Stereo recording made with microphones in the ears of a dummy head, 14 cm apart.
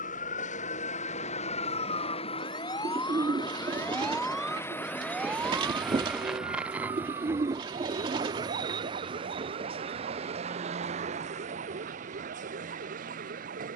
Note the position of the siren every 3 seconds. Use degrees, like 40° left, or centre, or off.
40° left, centre, 30° right, 50° right, 60° right.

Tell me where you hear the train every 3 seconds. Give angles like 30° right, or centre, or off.
40° left, 20° left, 20° right, 40° right, 50° right.